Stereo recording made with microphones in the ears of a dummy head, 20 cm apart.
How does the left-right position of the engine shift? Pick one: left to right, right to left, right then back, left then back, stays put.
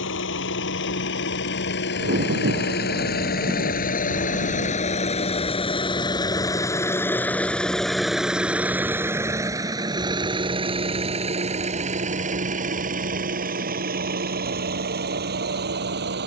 left to right.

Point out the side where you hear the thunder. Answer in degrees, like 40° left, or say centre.
50° right.